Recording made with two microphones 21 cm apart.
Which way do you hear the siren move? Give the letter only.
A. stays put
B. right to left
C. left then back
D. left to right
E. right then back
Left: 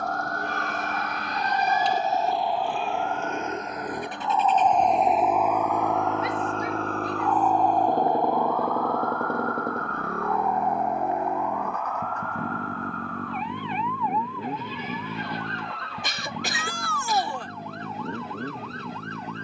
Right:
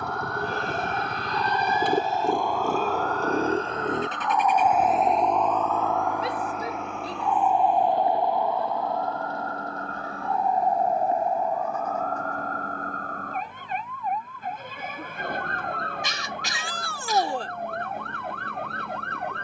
D.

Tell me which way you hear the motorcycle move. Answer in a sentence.
You can hear the motorcycle go from the right side to the left.